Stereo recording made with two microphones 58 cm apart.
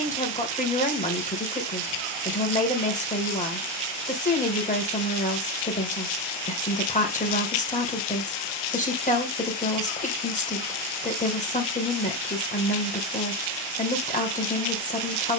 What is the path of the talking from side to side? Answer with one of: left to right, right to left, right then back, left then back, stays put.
stays put.